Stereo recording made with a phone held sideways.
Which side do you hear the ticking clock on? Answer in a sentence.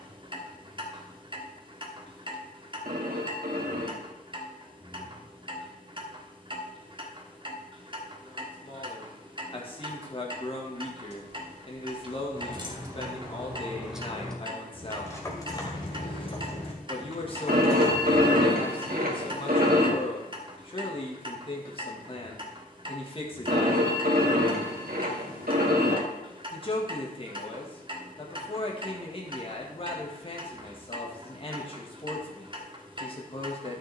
You can hear the ticking clock on the right.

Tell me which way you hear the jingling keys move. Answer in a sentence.
You can hear the jingling keys travel towards the left.